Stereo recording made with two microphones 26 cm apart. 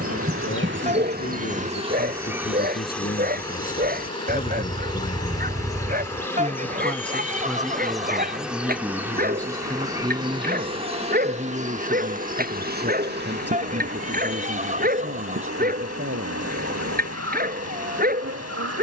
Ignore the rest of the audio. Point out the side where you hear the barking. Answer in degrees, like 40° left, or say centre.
40° right.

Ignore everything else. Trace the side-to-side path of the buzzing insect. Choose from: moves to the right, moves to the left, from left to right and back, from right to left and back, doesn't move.
from right to left and back.